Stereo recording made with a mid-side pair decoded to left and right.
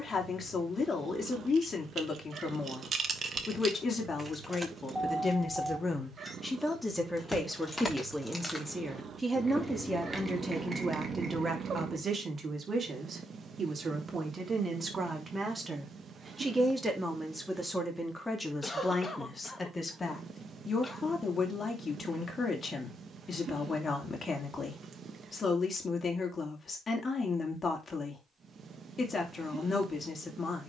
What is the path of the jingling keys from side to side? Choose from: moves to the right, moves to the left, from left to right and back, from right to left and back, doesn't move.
from right to left and back.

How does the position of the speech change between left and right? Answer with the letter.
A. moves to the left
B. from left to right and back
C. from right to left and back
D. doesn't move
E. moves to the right
B.